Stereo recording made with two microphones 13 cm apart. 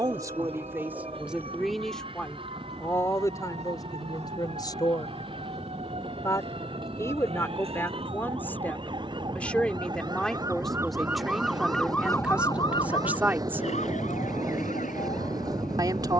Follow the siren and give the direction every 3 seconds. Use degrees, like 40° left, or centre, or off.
60° right, 60° right, 50° right, 20° right, 50° left, 80° left.